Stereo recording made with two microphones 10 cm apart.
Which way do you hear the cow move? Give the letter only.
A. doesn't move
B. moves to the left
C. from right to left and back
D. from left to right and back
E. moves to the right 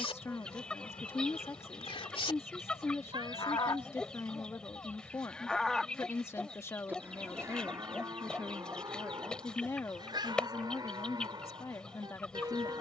E.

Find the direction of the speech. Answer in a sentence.
In this clip you hear the speech on the left.